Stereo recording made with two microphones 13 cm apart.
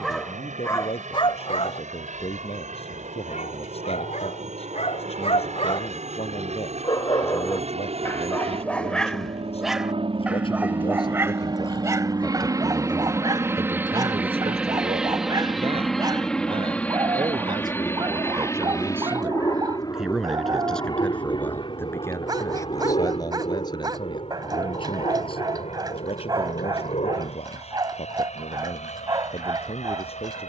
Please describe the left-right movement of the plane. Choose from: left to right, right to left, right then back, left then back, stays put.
right to left.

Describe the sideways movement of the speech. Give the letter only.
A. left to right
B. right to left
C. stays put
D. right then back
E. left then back
D.